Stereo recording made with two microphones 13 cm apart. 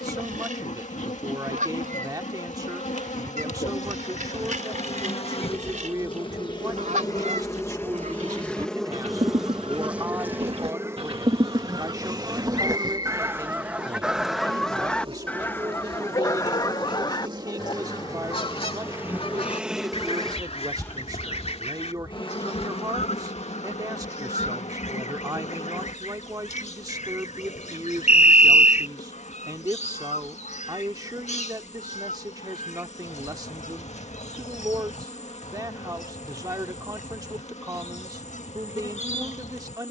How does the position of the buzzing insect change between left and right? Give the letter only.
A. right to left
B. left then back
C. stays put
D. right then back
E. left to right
D.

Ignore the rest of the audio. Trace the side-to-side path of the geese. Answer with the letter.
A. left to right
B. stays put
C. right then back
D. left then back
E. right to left
E.